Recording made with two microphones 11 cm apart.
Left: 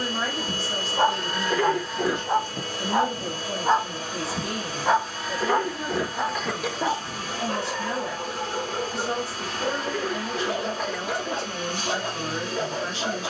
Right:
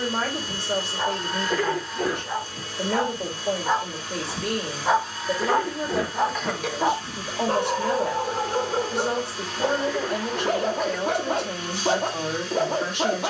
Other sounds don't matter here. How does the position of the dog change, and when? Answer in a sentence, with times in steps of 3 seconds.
In this clip you hear the dog on the left from 0 s, in the centre from 3 s and on the right from 6 s.